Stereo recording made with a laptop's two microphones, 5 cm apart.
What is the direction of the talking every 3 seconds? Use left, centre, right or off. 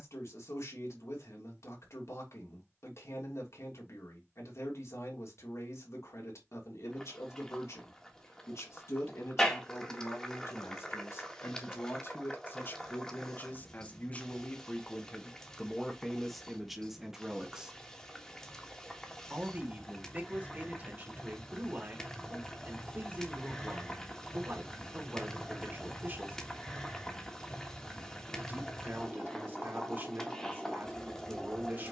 left, left, left, left, left, centre, right, right, right, right, right.